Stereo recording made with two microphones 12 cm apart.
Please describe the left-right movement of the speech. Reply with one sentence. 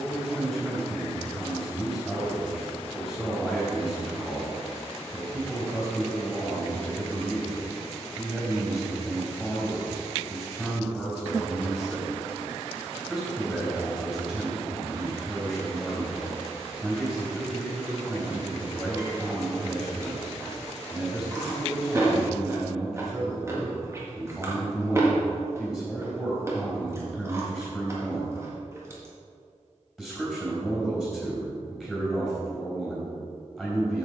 In this clip you hear the speech stay put.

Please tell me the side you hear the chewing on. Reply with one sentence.
You can hear the chewing on the right.